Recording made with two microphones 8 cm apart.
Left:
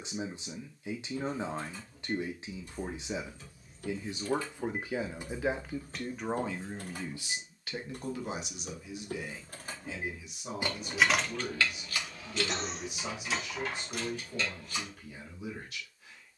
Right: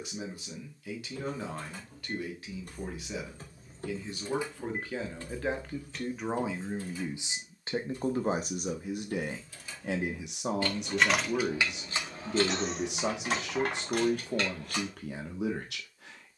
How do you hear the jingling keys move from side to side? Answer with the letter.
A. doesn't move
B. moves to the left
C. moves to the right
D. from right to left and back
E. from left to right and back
D.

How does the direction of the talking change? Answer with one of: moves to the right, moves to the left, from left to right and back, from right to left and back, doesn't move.
moves to the right.